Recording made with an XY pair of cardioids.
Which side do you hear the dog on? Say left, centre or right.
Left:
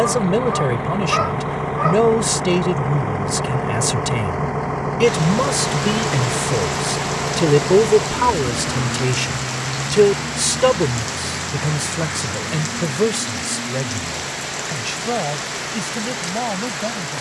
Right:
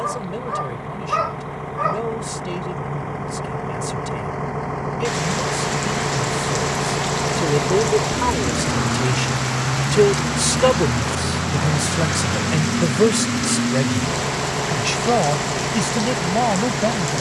centre.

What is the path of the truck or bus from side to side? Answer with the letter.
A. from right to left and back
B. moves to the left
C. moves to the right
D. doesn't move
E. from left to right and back
C.